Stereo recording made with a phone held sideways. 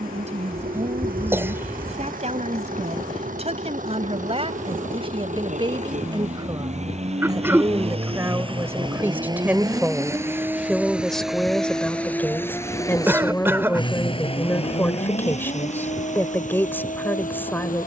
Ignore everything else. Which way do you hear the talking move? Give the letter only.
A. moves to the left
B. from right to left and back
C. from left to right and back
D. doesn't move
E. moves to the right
A.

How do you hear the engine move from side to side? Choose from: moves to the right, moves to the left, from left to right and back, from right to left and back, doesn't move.
moves to the left.